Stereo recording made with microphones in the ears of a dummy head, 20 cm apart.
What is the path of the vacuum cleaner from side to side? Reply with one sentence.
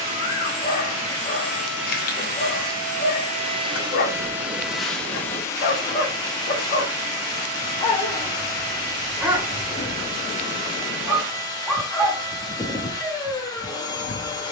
You can hear the vacuum cleaner move from right to left.